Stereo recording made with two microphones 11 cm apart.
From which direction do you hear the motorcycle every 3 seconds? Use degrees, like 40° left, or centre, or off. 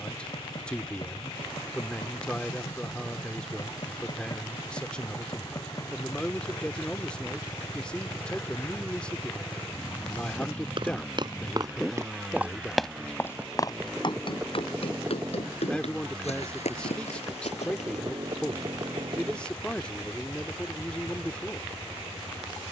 50° left, 40° left, 30° left, 10° left, 10° right, 30° right, 40° right, 50° right.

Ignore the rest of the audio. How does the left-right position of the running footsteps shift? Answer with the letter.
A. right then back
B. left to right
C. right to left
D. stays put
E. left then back
C.